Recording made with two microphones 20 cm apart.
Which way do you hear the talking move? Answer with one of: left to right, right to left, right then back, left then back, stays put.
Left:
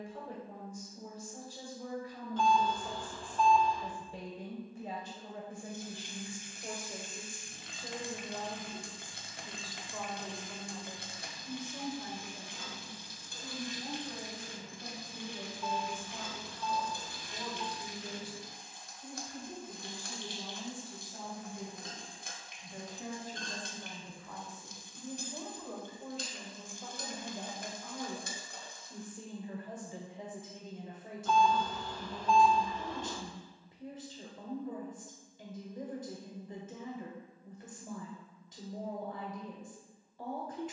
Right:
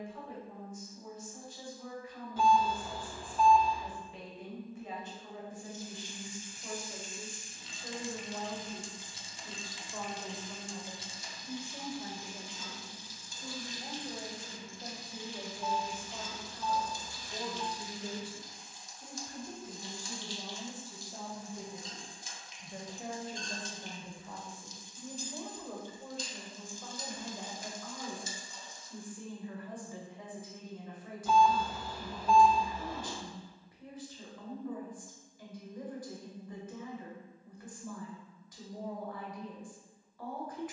right then back.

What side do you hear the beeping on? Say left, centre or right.
centre.